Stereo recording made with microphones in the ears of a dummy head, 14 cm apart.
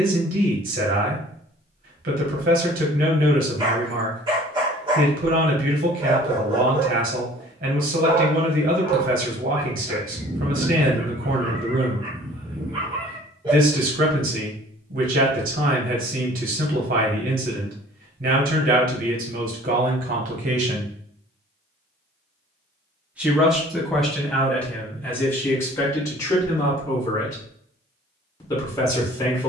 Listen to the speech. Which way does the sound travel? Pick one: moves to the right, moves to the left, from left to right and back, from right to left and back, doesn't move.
moves to the left.